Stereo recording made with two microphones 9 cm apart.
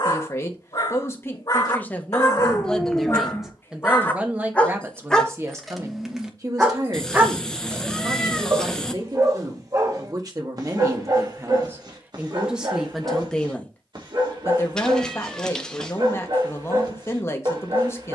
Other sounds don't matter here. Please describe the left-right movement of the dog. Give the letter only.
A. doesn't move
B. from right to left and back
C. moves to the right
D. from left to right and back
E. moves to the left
C.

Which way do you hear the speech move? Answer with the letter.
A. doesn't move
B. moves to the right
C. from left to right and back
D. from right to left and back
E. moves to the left
C.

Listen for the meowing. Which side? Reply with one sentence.
In this clip you hear the meowing in the centre.